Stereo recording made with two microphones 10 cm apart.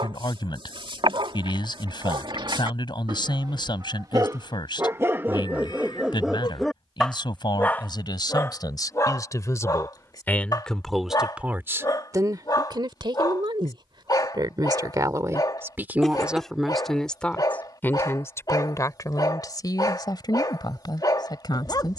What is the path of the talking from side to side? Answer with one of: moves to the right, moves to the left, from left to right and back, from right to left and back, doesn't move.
from left to right and back.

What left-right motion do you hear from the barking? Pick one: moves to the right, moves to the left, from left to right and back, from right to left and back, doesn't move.
moves to the left.